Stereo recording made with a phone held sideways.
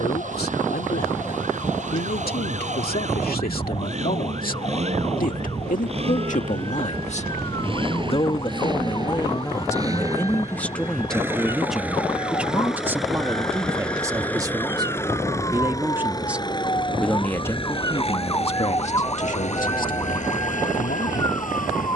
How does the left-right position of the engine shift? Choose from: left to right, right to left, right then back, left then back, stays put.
right to left.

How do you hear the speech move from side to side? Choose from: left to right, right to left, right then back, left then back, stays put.
right then back.